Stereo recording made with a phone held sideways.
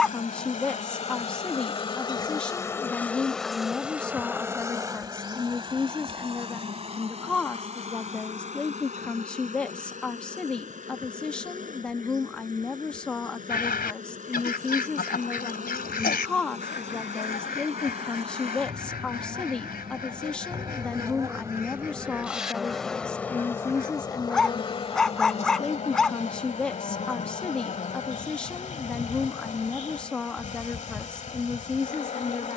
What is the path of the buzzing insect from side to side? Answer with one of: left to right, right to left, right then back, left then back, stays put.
right then back.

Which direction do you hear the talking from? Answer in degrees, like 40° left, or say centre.
10° left.